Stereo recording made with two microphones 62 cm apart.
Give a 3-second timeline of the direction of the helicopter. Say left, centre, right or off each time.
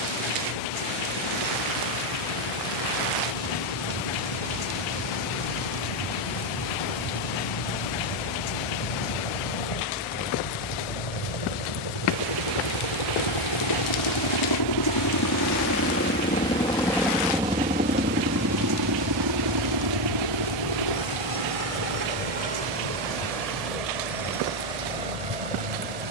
left, left, left, left, left, centre, right, right, right.